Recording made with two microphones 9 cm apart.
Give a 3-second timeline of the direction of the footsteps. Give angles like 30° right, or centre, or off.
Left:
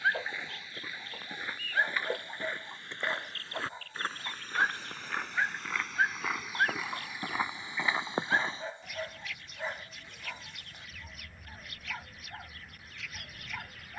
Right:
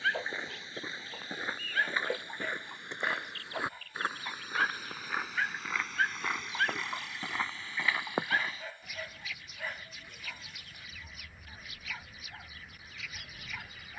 20° right, 10° right, 10° left, off, off.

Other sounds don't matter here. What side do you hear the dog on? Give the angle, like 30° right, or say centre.
20° left.